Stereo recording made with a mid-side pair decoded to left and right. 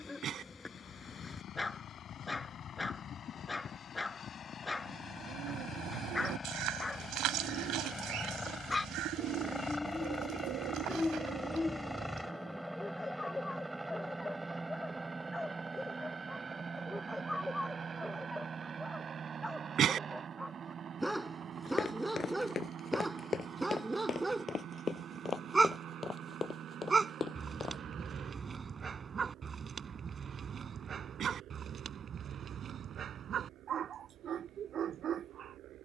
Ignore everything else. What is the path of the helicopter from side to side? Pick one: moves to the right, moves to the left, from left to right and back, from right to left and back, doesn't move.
moves to the right.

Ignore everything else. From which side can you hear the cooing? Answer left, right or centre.
right.